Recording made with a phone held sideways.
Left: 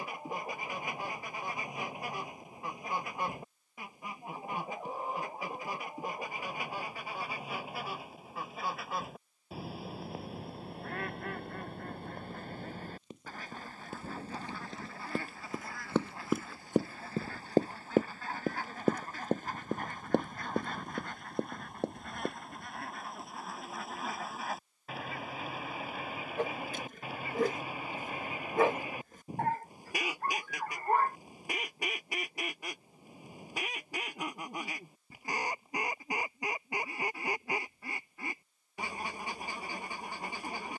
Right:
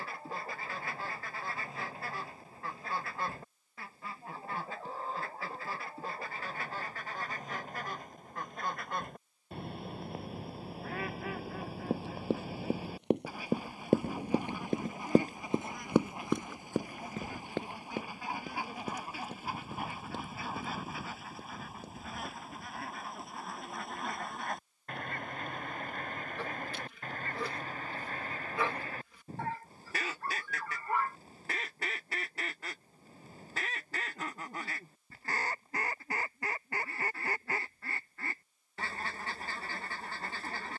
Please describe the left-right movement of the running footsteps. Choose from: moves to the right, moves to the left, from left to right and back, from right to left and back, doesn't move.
moves to the left.